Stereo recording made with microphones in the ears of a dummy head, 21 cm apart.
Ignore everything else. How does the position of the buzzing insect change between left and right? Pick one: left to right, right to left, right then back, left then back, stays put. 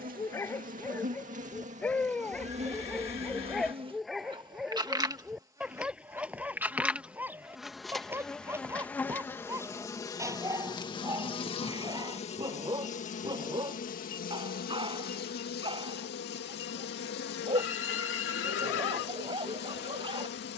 right to left.